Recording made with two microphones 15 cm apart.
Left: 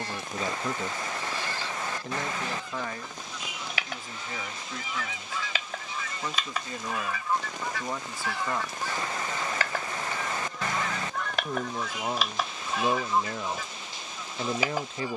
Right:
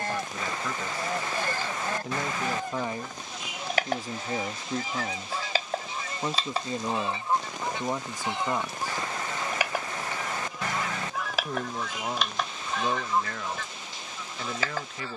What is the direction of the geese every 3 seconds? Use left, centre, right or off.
right, right, right, centre, centre.